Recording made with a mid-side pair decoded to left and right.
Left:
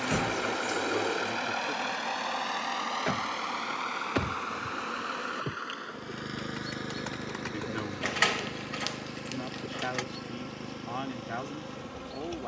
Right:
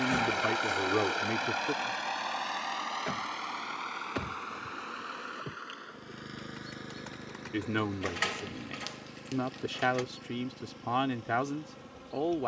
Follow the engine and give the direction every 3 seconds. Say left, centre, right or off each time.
centre, left, left, left.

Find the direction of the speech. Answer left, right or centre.
right.